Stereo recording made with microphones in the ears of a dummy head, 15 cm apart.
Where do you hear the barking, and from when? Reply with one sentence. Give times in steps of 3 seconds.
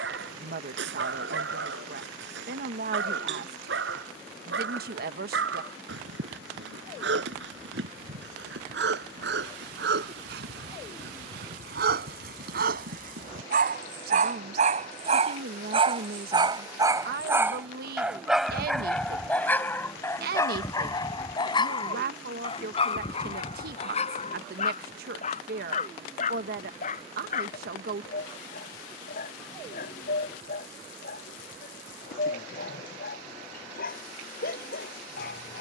In this clip you hear the barking on the right from 0 s, in the centre from 18 s and on the left from 21 s.